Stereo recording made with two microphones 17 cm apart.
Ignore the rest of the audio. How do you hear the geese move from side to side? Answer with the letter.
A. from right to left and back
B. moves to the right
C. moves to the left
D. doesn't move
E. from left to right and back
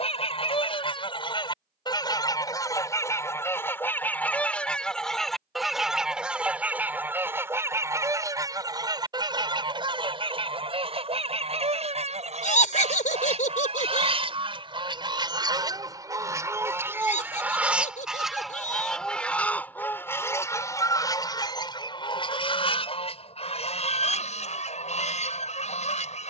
E.